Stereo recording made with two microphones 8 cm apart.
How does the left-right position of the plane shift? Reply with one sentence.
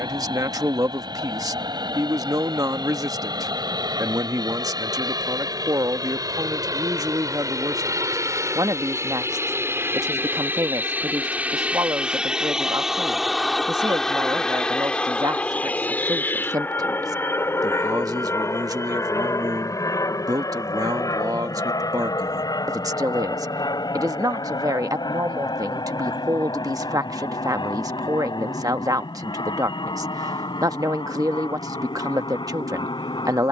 You can hear the plane travel towards the left.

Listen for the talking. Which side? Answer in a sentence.
You can hear the talking on the right.